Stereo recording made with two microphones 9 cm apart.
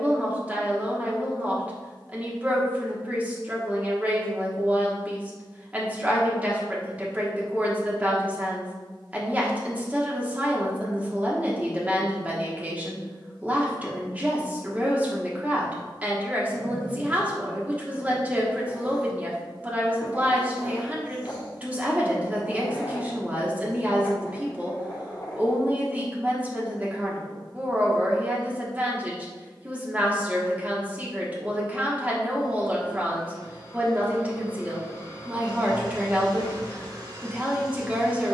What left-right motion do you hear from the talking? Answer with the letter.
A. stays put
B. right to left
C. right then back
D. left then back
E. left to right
A.